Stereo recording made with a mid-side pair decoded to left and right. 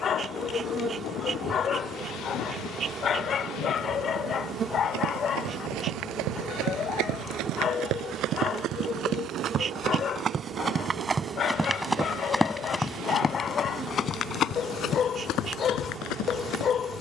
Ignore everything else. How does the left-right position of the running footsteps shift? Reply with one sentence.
In this clip you hear the running footsteps move from right to left.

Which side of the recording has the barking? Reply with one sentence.
You can hear the barking on the left.